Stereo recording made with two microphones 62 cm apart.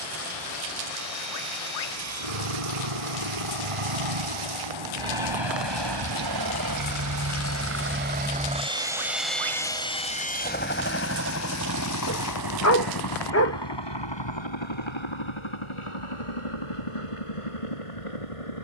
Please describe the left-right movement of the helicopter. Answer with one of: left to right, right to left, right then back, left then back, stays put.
right to left.